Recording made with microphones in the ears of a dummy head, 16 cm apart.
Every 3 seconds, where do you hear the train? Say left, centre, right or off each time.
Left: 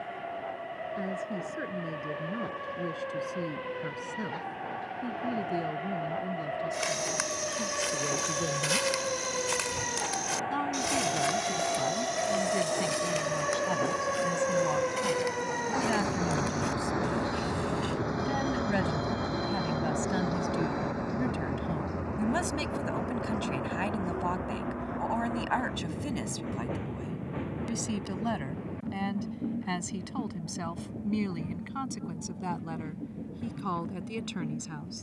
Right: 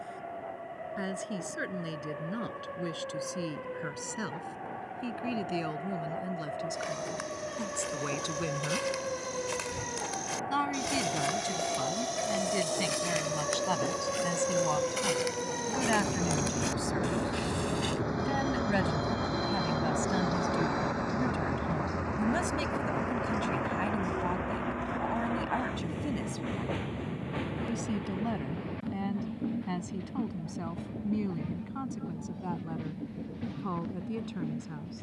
left, left, left, left, left, left, centre, right, right, right, right, right.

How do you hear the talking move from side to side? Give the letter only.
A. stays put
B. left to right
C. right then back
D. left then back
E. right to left
E.